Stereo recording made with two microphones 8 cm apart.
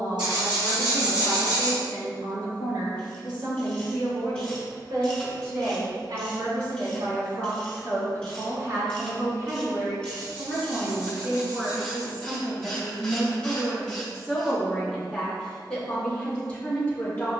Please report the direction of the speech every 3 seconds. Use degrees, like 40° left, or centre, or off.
70° right, 70° right, 60° right, 30° right, 10° right, 10° left.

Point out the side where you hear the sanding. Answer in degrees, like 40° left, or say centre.
70° right.